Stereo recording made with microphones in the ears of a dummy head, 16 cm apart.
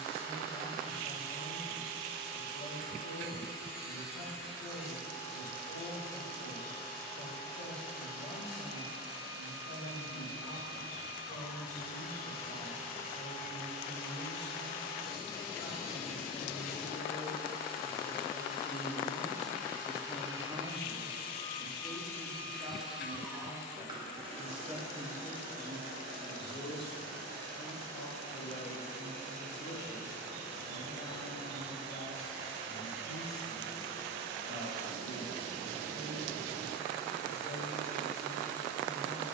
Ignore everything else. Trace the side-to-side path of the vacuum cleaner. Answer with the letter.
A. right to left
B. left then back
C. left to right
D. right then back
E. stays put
C.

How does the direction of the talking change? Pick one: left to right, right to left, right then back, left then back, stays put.
right then back.